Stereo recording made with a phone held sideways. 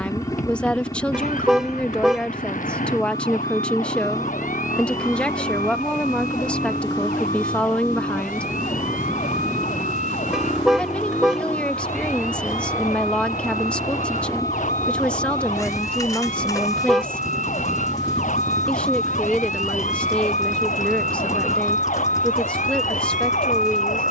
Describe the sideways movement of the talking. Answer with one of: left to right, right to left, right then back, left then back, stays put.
stays put.